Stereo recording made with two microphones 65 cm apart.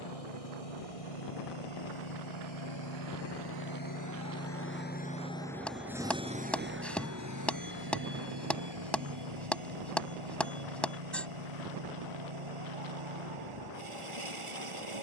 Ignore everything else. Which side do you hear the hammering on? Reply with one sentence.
You can hear the hammering in the centre.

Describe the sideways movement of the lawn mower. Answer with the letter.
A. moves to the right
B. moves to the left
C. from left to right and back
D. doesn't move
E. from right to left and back
A.